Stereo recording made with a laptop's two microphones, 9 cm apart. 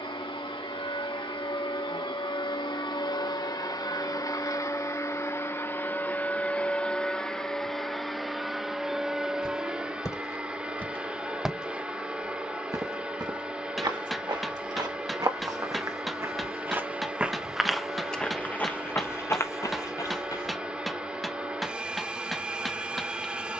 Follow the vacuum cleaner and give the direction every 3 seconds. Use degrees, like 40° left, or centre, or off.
70° left, 40° left, 10° left, 10° right, 10° right, 10° right, 10° right, 10° right.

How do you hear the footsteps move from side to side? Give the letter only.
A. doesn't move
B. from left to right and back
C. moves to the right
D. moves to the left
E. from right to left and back
B.